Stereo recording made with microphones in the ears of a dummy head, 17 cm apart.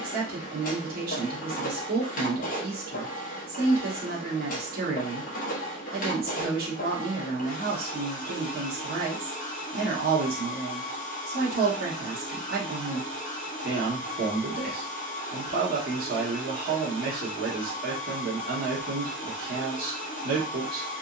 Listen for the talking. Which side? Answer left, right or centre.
right.